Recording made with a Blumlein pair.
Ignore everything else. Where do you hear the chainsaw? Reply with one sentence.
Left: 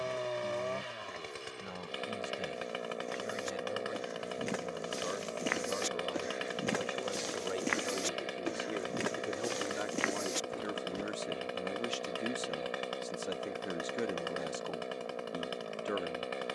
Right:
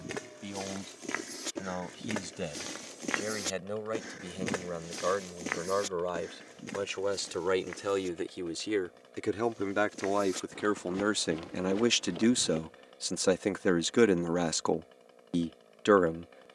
You can hear the chainsaw on the left.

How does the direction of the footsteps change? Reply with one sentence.
In this clip you hear the footsteps move from right to left and back again.